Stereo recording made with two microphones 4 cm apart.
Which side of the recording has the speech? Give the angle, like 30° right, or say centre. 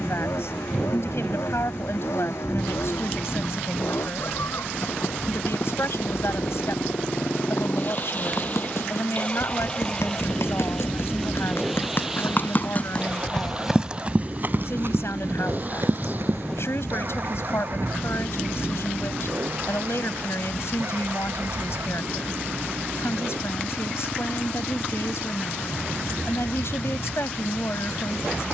70° left.